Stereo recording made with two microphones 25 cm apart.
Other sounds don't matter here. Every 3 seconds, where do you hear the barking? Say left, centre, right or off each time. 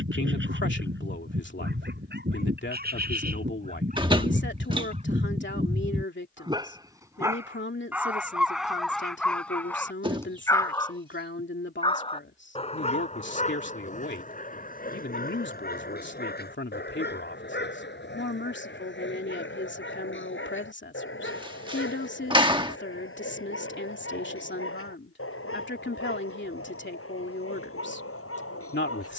right, right, centre, centre, left, left, left, left, left, left.